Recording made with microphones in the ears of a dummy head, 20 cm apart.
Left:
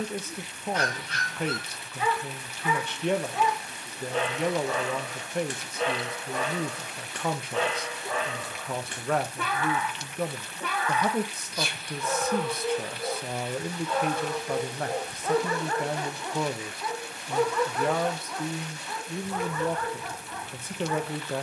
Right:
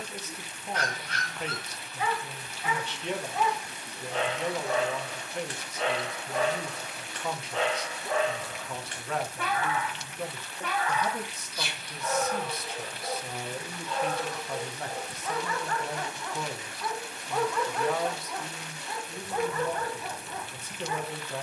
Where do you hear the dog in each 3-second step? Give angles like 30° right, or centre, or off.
80° left, 80° left, 80° left, 80° left, 60° left, 10° left, 10° right.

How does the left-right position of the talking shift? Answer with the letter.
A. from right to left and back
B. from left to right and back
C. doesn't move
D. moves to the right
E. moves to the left
C.